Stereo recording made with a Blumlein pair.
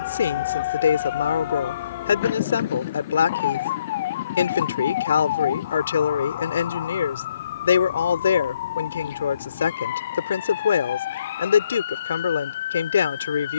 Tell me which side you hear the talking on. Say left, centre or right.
left.